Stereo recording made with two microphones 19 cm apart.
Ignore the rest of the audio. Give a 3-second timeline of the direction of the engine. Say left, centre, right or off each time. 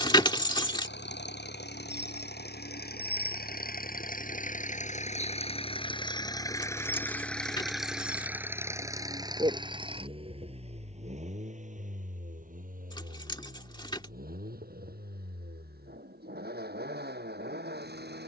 left, left, centre, right, right, right.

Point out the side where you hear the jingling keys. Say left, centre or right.
left.